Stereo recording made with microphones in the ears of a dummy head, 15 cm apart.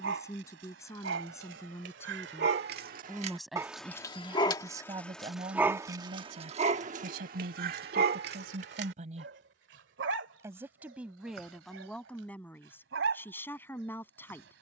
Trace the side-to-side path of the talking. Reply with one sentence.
You can hear the talking move from left to right and back again.